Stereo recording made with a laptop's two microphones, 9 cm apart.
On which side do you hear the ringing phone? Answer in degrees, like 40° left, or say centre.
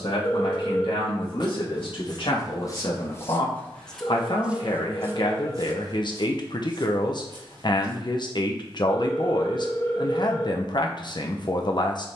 30° left.